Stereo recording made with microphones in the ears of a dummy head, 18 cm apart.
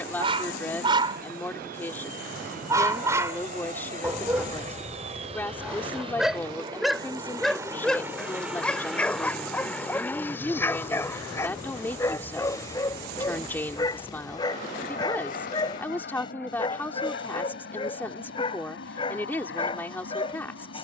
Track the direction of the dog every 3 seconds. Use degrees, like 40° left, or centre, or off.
20° right, 10° right, centre, 10° left, 20° left, 20° left, 30° left.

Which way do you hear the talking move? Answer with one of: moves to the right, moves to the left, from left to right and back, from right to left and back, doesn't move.
doesn't move.